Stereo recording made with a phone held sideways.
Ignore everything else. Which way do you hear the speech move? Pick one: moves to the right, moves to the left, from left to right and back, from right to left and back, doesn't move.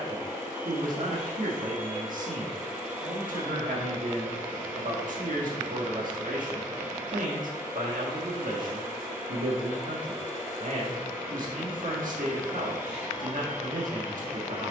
doesn't move.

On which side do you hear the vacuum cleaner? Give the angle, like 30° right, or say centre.
20° right.